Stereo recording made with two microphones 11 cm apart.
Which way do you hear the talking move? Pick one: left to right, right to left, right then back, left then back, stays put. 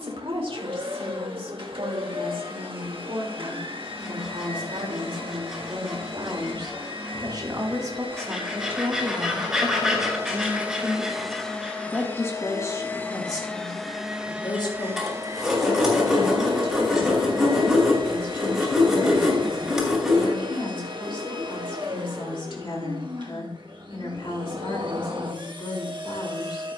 right to left.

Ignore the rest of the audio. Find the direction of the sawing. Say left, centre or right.
centre.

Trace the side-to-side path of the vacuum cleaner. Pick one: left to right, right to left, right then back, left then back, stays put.
left then back.